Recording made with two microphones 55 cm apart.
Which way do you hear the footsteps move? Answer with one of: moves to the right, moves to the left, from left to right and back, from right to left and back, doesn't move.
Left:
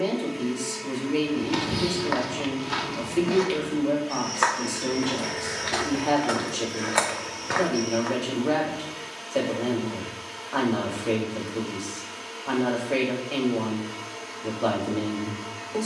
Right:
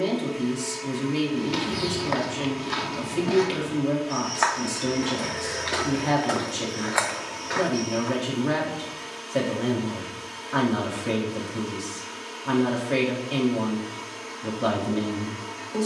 from left to right and back.